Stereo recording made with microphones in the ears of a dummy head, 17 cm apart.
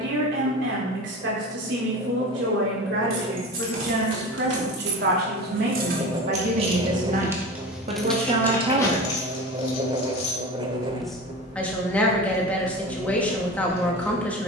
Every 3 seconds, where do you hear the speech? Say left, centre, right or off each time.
right, right, right, centre, centre.